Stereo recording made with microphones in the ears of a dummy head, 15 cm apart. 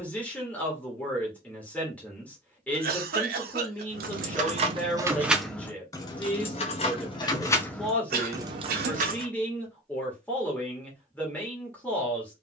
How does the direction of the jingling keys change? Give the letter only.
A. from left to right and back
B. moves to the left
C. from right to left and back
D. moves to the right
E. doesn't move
C.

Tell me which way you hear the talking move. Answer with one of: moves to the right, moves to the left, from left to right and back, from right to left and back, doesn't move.
doesn't move.